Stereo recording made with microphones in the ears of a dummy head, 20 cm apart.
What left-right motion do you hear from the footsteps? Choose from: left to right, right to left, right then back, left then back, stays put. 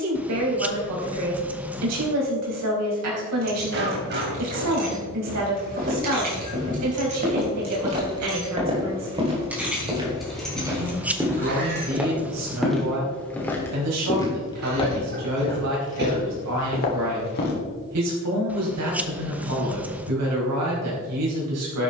right to left.